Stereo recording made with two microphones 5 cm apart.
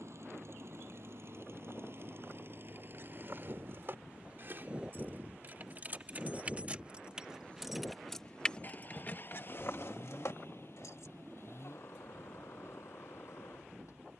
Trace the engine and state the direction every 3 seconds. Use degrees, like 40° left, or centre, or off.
50° right, 30° right, 20° left, 50° left, 60° left.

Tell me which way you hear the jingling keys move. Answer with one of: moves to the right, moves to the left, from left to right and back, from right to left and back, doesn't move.
moves to the left.